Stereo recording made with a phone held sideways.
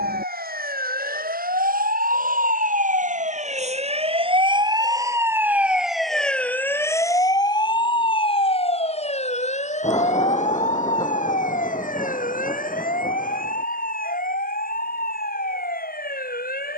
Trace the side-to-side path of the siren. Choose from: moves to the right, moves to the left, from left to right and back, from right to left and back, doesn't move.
moves to the left.